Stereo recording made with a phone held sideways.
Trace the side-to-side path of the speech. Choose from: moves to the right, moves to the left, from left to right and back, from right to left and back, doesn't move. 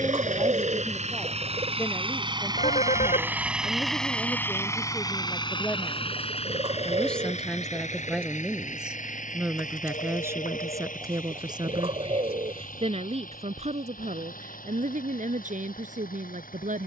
moves to the right.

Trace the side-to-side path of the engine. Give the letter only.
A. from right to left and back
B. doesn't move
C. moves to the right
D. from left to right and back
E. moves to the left
E.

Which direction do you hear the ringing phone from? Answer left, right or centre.
left.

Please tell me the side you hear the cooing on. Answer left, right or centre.
right.